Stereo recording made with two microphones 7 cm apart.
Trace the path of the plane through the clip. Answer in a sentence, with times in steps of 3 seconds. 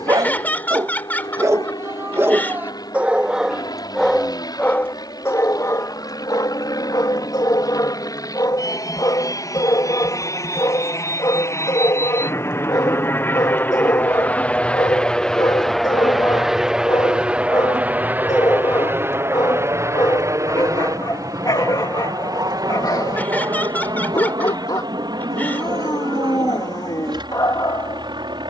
In this clip you hear the plane on the left from 0 s, in the centre from 15 s and on the right from 18 s.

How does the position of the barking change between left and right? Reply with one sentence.
In this clip you hear the barking go from the right side to the left.